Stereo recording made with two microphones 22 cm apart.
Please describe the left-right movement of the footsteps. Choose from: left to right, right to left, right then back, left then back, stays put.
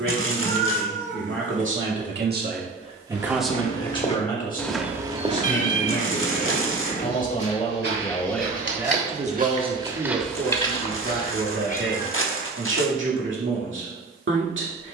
right then back.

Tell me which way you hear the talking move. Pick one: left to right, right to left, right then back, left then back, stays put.
left then back.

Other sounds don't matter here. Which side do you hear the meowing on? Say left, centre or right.
left.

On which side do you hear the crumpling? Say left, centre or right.
left.